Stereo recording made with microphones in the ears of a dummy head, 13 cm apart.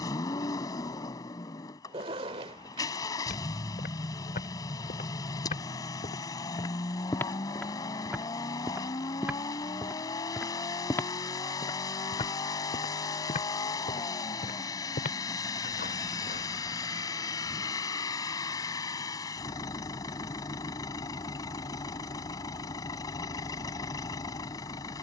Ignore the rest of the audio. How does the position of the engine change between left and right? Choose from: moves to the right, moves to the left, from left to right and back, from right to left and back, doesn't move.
doesn't move.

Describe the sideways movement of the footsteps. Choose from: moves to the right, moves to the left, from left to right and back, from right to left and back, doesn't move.
from left to right and back.